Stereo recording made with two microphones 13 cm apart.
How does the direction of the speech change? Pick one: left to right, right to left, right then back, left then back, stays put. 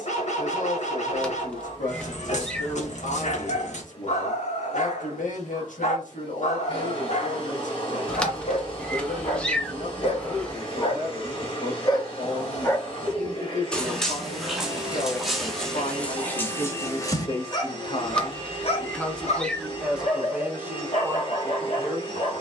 left to right.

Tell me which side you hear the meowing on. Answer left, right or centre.
centre.